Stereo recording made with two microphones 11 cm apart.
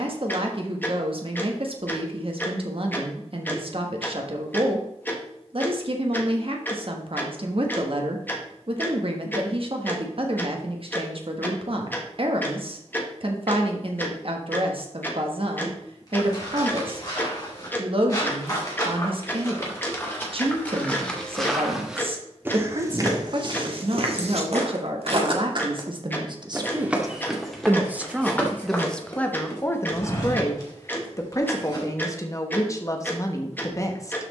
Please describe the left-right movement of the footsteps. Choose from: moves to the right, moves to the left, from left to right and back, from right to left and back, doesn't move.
from left to right and back.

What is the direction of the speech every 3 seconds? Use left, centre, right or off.
right, right, right, right, right, right, right, right, right, centre, left, left.